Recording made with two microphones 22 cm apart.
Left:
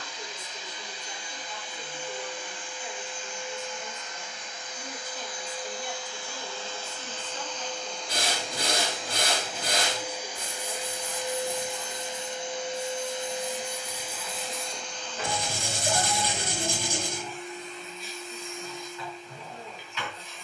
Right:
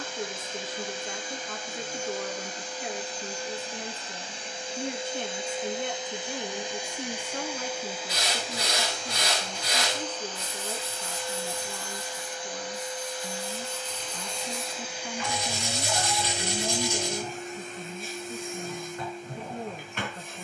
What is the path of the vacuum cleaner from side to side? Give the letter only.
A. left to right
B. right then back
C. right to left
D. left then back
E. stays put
D.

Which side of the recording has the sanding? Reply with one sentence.
You can hear the sanding on the left.